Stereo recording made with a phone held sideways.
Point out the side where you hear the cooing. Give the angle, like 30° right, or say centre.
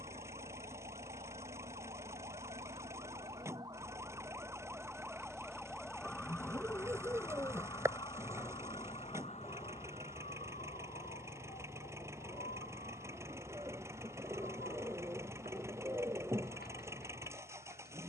20° right.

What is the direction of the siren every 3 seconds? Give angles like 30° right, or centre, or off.
40° right, 20° right, 20° left, 50° left, 70° left, 80° left.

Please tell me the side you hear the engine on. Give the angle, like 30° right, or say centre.
20° right.